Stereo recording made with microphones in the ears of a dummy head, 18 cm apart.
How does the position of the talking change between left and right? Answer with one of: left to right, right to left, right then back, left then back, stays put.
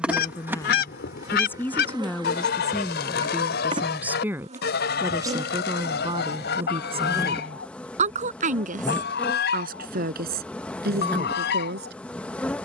left to right.